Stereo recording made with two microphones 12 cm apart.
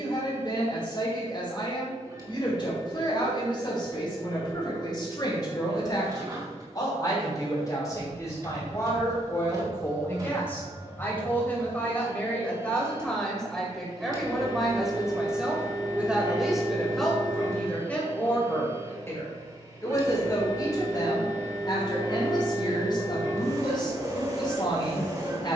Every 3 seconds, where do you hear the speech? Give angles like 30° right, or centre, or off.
40° left, 40° left, 30° left, 20° left, 10° left, centre, 30° left, 40° left, 40° left.